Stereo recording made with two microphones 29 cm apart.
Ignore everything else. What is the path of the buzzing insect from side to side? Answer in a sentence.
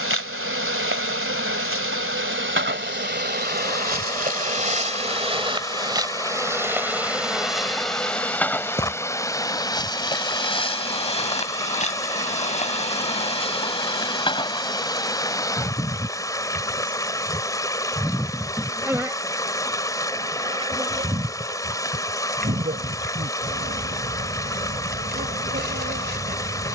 In this clip you hear the buzzing insect go left and come back.